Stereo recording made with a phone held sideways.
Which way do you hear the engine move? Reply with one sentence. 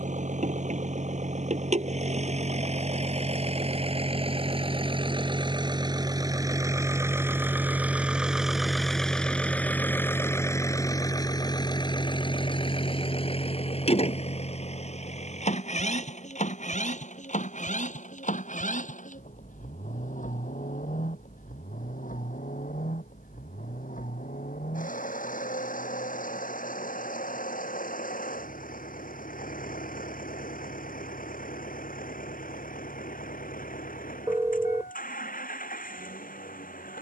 In this clip you hear the engine move from right to left.